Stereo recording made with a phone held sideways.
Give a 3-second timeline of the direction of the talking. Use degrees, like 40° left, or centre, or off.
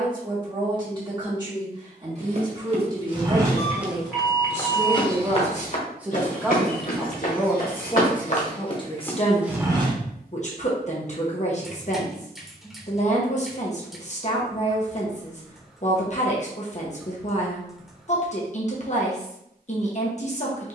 30° right, 20° right, 10° left, 40° left, 50° left, 50° left, 50° left.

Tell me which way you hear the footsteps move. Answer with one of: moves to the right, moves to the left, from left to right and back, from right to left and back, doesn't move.
from right to left and back.